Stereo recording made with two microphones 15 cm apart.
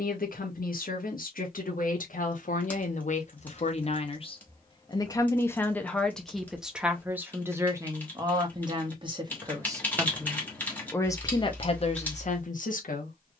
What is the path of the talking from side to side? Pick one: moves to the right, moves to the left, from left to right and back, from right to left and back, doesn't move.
from left to right and back.